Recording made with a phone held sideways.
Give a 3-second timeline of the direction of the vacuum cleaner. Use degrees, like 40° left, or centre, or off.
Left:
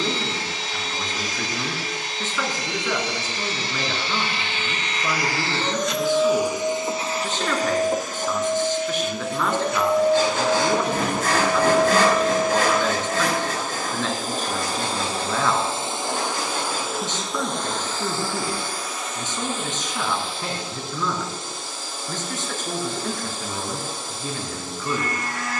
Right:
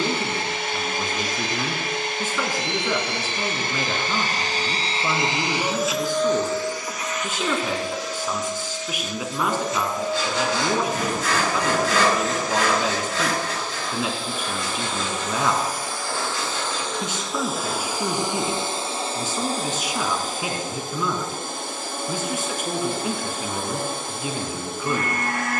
60° right, 40° right, 40° left, 60° left, 50° left, 10° left, 30° right, 50° right, 60° right.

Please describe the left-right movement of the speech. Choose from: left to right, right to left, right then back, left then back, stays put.
stays put.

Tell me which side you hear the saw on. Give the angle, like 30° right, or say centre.
50° left.